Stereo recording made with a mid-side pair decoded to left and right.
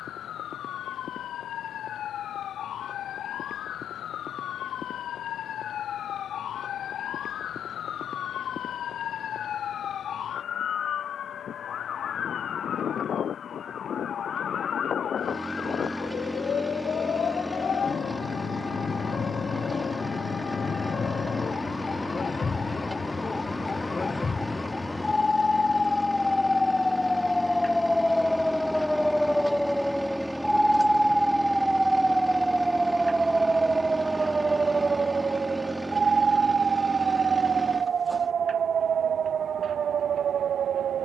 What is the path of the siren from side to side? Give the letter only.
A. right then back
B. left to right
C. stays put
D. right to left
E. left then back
B.